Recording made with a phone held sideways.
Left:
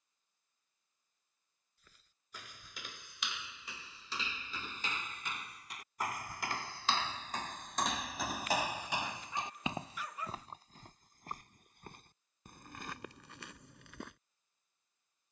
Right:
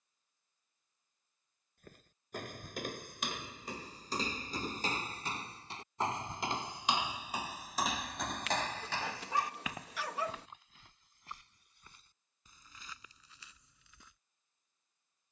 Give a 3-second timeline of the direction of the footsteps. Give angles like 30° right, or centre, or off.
50° right, 40° right, 10° right, 30° left, 60° left.